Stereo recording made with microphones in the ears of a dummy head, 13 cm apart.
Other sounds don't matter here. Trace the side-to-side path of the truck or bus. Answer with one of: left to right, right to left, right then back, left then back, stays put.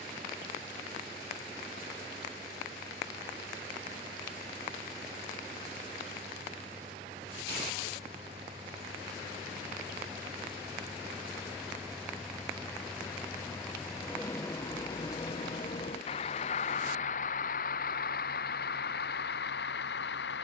right to left.